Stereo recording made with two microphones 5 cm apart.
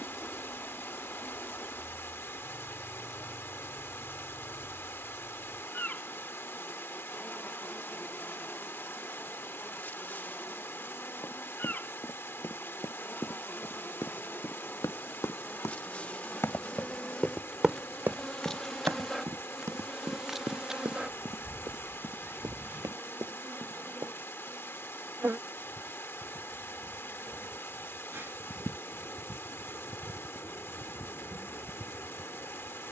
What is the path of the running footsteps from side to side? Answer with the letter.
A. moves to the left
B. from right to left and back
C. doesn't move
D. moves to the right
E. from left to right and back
D.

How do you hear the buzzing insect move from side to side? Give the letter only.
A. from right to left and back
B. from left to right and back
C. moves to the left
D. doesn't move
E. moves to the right
E.